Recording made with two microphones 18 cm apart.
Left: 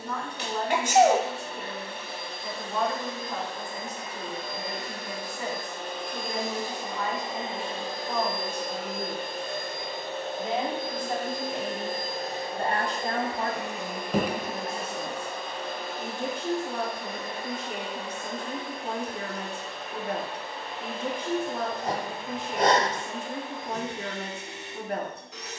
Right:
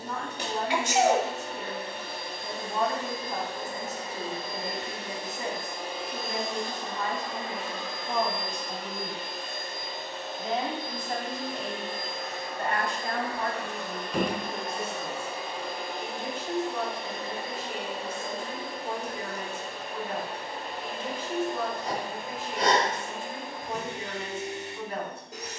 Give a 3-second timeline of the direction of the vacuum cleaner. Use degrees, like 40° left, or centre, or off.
50° right, 30° right, 20° left, 50° left, 20° left, 20° right, 40° right, 40° right, 40° right.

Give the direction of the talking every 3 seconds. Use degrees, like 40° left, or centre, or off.
20° right, 20° right, 20° right, 10° left, 40° left, 60° left, 60° left, 60° left, 60° left.